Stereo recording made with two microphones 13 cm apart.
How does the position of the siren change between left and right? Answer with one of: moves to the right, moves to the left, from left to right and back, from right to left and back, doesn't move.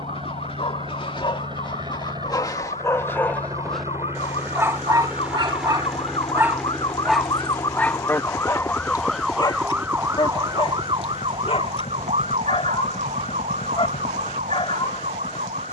moves to the right.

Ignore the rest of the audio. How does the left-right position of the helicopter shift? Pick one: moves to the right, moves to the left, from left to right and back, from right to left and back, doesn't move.
moves to the left.